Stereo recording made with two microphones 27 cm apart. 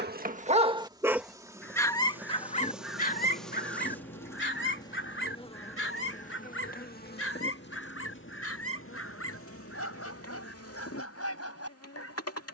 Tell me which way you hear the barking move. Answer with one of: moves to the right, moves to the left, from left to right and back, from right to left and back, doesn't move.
moves to the left.